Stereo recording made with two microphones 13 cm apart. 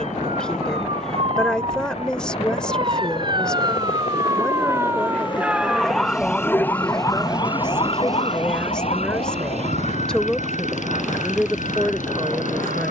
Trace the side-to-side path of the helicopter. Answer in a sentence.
In this clip you hear the helicopter move from left to right.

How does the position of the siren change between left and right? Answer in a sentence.
In this clip you hear the siren move to the left.